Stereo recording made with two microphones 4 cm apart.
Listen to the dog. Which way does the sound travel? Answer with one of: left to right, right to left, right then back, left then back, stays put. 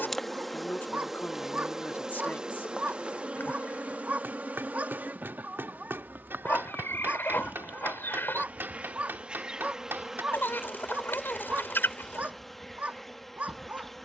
stays put.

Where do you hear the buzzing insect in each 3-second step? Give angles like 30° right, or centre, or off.
10° right, 40° right, 40° right, 10° right, 10° left.